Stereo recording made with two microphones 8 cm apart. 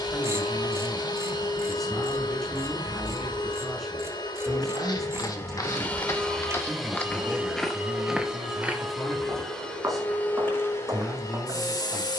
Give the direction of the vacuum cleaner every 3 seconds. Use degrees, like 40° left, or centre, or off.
60° left, 50° left, centre, 30° left.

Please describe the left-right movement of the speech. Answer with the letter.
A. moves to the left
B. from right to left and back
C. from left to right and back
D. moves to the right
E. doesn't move
E.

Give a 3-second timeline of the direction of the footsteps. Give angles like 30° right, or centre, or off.
off, 50° left, 10° left, 40° right.